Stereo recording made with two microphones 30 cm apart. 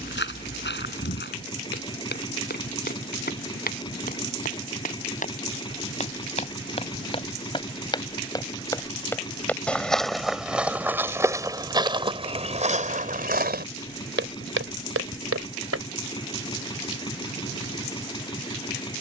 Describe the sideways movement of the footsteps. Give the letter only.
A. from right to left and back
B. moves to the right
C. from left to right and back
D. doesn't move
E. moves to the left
B.